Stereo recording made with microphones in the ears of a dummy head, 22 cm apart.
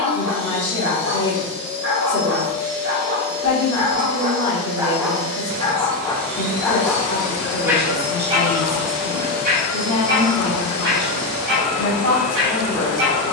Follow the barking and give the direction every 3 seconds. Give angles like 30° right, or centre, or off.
60° right, 20° right, 10° right, 40° right, 50° right.